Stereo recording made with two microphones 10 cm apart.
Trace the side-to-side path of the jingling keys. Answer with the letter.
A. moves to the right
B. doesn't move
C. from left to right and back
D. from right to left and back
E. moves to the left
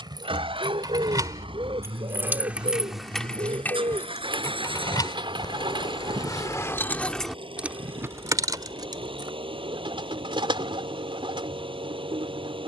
D.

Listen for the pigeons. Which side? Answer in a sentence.
In this clip you hear the pigeons on the right.